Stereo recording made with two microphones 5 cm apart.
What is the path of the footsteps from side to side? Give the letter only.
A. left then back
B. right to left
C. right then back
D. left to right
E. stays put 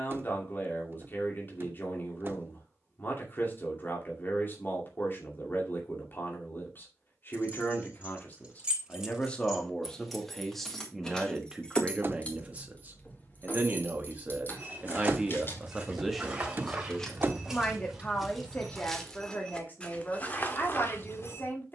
B.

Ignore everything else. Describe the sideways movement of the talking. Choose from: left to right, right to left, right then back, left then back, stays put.
right then back.